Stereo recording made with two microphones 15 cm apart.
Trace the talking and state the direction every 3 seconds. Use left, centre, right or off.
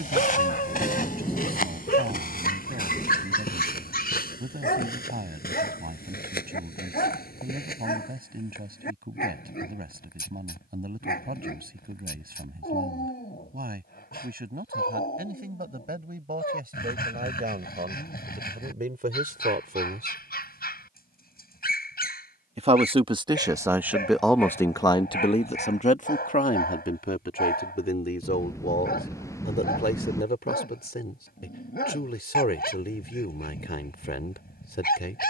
right, right, right, right, right, right, right, right, left, left, left, left.